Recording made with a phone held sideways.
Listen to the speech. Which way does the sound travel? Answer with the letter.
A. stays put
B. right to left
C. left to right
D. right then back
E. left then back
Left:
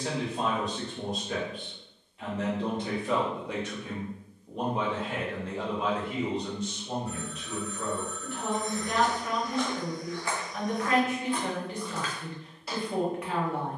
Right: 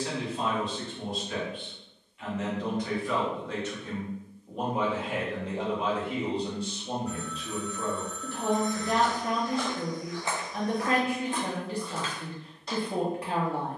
C.